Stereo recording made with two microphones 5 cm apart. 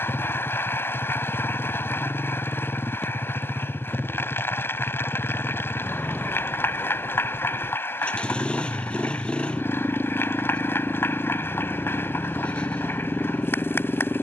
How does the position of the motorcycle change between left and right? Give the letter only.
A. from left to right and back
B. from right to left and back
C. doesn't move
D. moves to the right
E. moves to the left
C.